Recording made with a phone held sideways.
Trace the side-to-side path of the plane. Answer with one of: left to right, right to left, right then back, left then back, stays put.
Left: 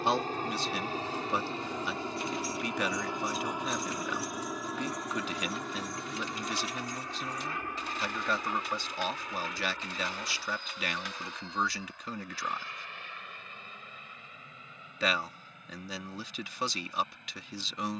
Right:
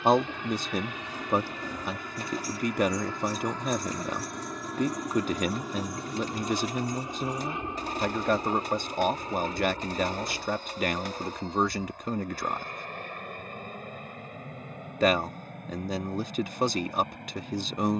left to right.